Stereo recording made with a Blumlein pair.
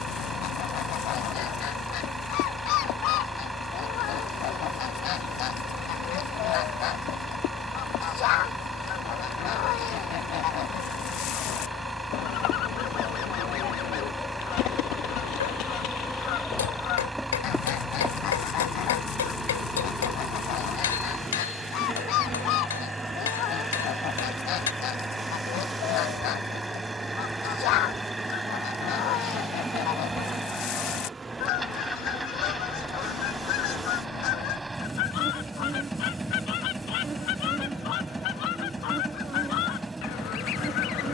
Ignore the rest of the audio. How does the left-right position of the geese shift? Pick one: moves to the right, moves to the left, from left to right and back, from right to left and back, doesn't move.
doesn't move.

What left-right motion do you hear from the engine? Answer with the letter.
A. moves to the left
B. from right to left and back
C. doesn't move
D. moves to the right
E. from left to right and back
C.